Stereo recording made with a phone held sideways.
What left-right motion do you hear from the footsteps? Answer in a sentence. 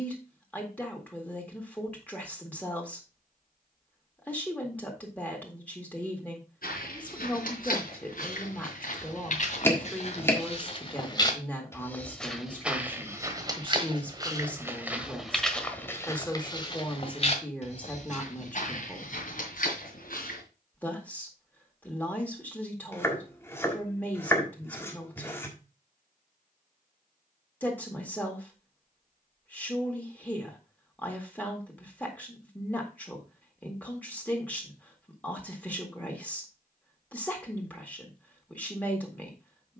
In this clip you hear the footsteps go right and come back.